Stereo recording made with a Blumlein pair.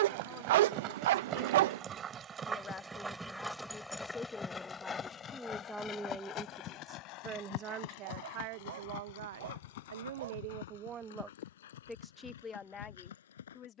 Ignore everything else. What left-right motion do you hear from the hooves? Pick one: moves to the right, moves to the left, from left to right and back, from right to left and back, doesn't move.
moves to the left.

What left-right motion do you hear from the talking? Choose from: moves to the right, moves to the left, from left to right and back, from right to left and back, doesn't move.
from left to right and back.